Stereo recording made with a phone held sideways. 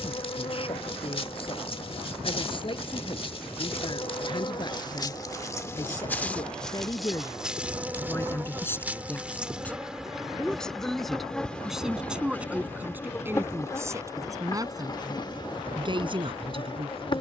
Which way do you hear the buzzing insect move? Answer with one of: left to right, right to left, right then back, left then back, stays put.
right then back.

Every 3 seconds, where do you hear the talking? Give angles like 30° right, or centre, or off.
40° left, 30° left, 20° left, centre, 20° right, 40° right.